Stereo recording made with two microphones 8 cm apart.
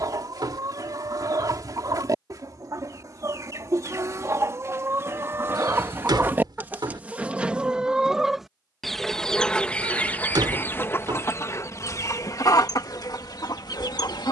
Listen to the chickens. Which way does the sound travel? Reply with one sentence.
In this clip you hear the chickens move from right to left.